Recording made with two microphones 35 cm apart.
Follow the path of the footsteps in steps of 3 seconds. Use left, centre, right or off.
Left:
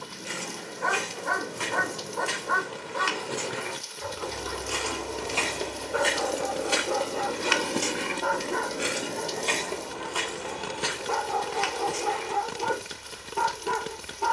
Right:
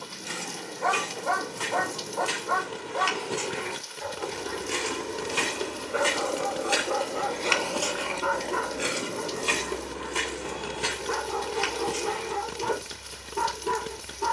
right, right, centre, right, right.